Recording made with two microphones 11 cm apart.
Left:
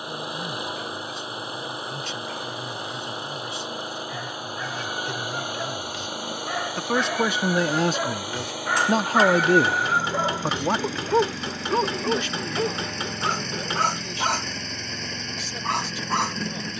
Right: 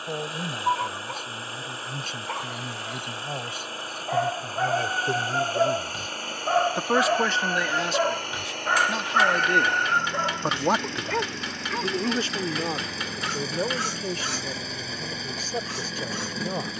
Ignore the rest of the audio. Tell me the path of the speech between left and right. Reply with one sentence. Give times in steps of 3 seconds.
You can hear the speech on the right from 0 s, on the left from 6 s, in the centre from 9 s and on the right from 12 s.